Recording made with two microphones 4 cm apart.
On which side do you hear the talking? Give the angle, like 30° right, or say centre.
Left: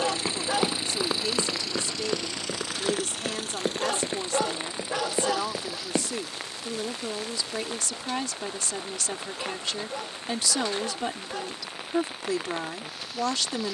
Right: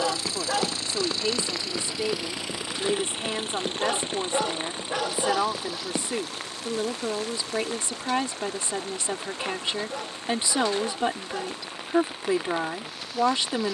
30° right.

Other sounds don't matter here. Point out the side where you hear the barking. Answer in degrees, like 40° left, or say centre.
centre.